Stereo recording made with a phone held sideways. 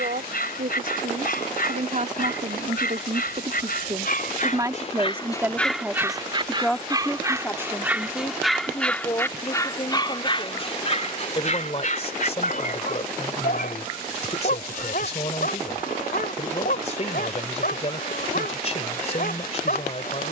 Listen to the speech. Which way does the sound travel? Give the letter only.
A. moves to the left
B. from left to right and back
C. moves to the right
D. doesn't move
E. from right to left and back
A.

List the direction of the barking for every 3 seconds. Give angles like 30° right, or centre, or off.
70° left, 50° left, 10° right, 40° left, 60° left, 70° left, 70° left.